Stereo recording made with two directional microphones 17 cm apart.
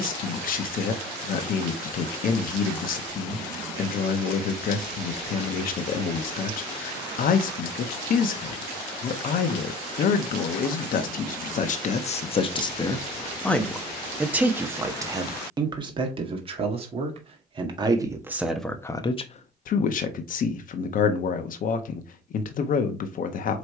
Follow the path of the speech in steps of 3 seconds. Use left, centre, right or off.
left, left, left, left, centre, right, left, left.